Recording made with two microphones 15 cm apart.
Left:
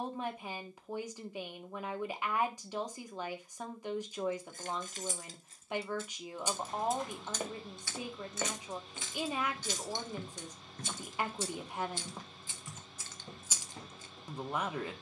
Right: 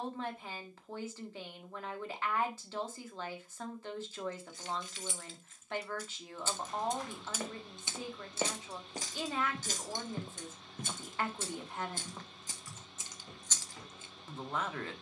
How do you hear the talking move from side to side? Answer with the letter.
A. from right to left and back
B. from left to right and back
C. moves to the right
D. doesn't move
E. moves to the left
D.